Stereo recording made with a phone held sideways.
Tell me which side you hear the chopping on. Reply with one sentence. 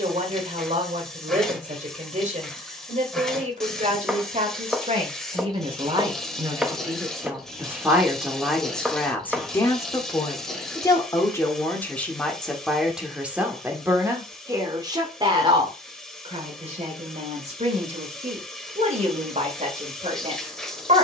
In this clip you hear the chopping in the centre.